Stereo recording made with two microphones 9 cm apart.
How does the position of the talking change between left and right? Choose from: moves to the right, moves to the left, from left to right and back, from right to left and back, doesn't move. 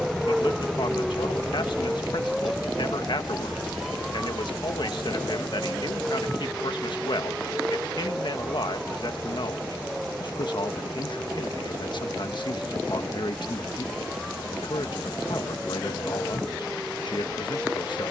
doesn't move.